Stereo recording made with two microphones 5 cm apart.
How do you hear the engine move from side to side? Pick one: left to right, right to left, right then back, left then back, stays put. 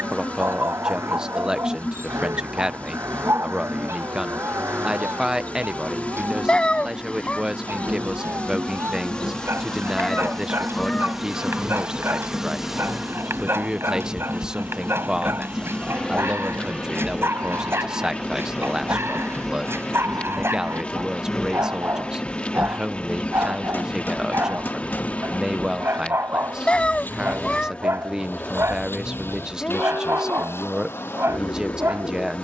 right to left.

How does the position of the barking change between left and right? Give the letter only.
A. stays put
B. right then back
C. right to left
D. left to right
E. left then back
A.